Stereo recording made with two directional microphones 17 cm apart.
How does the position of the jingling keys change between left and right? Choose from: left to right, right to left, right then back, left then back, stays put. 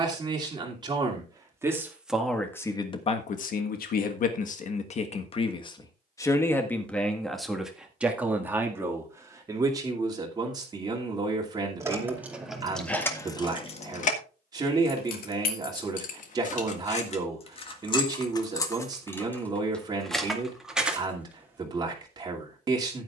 left then back.